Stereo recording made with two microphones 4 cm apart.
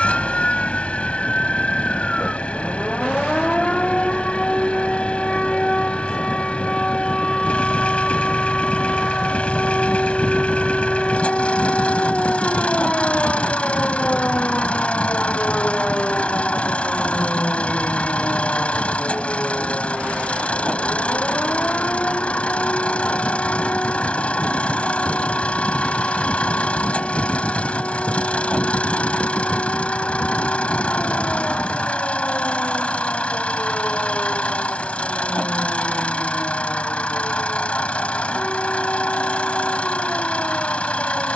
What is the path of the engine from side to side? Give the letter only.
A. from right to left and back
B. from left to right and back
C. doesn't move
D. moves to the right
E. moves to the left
C.